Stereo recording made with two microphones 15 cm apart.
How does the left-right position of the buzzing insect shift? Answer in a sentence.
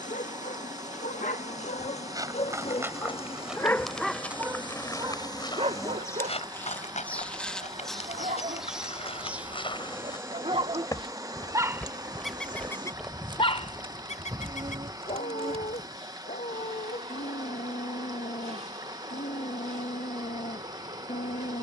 In this clip you hear the buzzing insect move from left to right.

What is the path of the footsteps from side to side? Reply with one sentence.
You can hear the footsteps move from right to left and back again.